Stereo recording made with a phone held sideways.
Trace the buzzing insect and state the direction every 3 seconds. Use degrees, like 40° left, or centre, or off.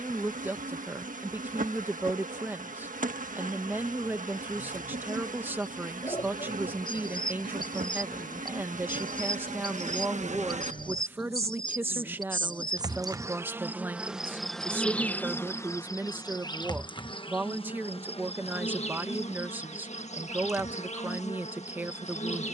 70° right, 70° right, 70° right, 60° right, 10° right, 30° left, 50° left, 50° left.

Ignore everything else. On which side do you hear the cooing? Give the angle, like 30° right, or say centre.
30° left.